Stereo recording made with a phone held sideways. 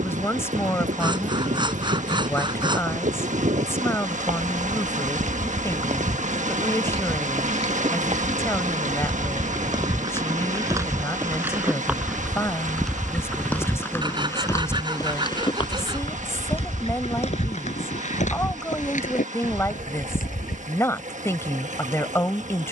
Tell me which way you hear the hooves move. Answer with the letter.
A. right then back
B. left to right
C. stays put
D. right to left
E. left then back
D.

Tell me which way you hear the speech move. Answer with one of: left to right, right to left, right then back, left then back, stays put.
stays put.